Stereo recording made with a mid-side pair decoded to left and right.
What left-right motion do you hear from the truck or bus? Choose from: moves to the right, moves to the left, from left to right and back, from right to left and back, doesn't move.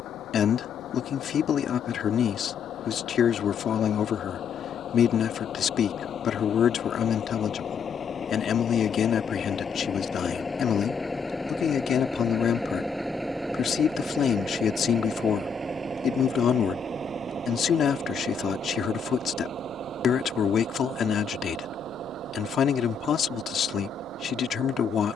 moves to the right.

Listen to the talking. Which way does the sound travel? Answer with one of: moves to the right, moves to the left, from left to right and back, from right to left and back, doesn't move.
doesn't move.